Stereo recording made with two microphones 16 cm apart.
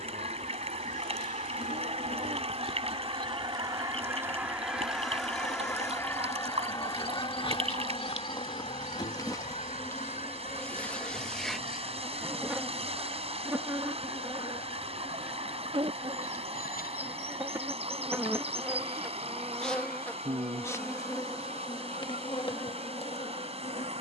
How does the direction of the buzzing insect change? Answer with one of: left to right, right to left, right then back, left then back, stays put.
right then back.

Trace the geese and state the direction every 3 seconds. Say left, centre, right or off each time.
right, centre, left, left, left, left, left, left.